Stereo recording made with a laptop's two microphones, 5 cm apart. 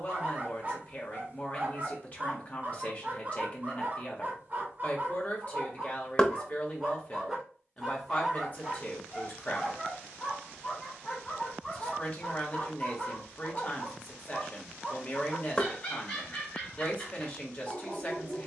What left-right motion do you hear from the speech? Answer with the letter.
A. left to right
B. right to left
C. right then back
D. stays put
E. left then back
D.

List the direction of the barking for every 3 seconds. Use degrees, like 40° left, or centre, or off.
40° right, 30° right, 10° right, 20° left, 30° left, 30° left.